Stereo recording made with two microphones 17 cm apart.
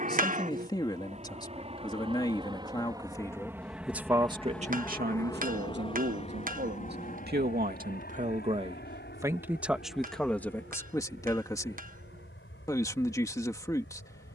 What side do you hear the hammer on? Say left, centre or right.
right.